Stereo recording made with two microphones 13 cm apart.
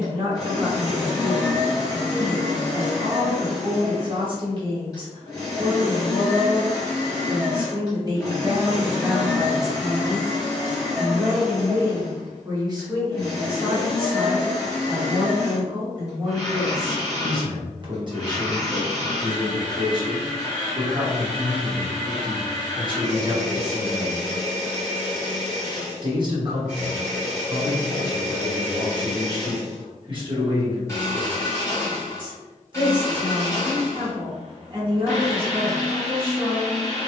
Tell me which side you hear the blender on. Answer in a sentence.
In this clip you hear the blender on the left.